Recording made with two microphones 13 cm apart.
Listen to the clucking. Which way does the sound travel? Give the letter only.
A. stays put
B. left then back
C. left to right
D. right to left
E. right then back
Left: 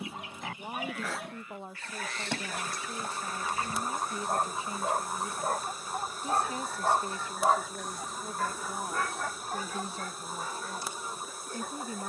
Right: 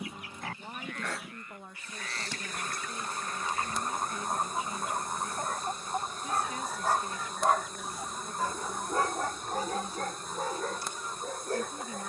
E.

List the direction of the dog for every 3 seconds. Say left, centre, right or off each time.
left, left, centre, right.